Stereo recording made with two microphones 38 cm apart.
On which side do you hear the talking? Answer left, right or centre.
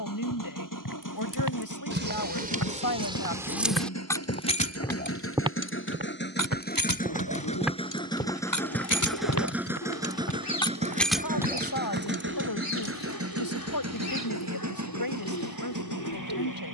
left.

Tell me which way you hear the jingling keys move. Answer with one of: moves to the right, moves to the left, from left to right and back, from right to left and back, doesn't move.
from right to left and back.